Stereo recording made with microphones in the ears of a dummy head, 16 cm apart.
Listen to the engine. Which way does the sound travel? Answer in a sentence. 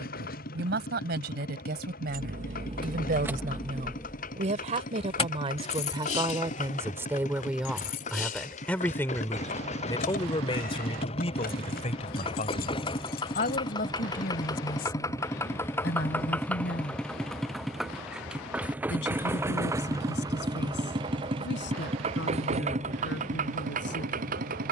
In this clip you hear the engine move to the right.